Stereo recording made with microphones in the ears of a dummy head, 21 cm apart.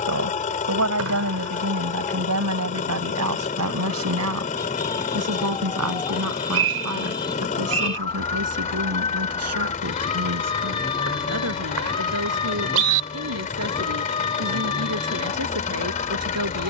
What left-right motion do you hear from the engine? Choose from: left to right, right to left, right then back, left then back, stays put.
stays put.